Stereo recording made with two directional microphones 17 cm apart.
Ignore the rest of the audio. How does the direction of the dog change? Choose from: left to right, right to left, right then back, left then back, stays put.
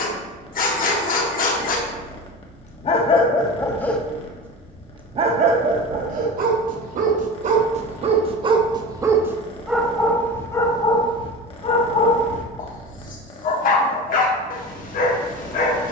right then back.